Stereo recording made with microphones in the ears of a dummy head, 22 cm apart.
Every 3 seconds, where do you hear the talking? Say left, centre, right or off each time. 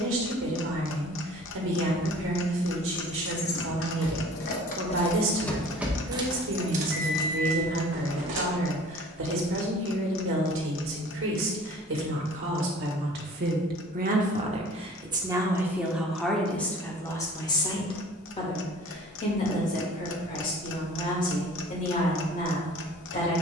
right, right, right, right, right, centre, left, left.